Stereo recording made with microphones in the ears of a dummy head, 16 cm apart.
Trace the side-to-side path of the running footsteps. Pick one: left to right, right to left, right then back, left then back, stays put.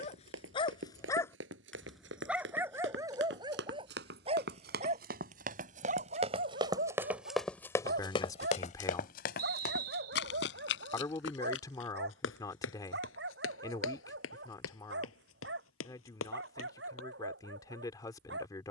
right to left.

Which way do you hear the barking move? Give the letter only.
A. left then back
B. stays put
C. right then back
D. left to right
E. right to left
D.